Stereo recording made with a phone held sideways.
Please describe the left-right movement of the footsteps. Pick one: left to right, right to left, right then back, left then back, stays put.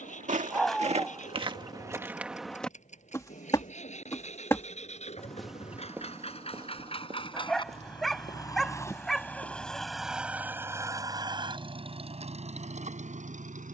left then back.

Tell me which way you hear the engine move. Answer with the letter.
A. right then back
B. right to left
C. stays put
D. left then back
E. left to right
E.